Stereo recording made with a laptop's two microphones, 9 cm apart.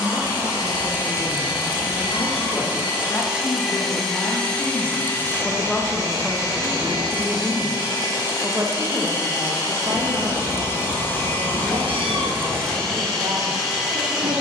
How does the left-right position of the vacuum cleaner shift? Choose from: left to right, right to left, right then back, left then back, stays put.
left then back.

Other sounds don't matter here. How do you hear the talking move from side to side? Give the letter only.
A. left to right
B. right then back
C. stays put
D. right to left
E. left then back
A.